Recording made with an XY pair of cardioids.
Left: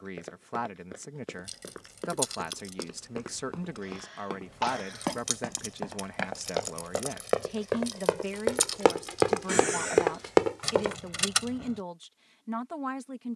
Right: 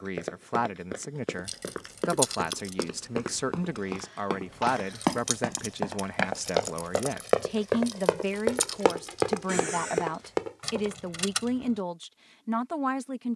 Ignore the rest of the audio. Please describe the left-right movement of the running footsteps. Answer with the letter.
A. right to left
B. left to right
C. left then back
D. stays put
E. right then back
A.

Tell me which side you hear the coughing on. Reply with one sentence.
In this clip you hear the coughing on the left.